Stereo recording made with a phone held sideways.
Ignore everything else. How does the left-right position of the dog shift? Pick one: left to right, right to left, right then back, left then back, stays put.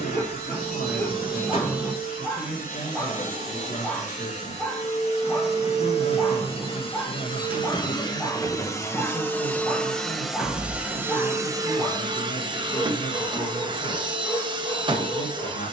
stays put.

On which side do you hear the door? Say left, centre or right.
centre.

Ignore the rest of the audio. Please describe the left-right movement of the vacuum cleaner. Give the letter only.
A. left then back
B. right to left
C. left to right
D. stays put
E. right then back
C.